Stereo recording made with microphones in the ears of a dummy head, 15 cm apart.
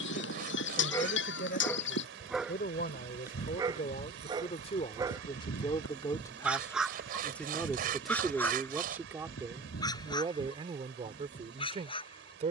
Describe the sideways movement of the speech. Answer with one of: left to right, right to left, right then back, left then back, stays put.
left to right.